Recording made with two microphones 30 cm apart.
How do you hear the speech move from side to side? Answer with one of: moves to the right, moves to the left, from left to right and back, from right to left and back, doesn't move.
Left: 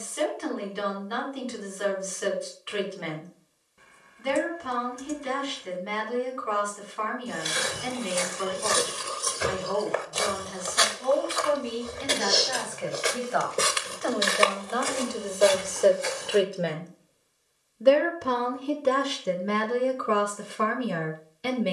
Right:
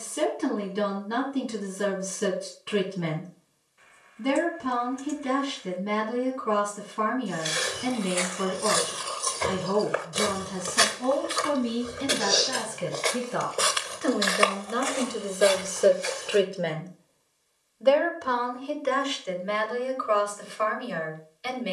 moves to the left.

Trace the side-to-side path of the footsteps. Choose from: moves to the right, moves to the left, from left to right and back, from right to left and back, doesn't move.
from left to right and back.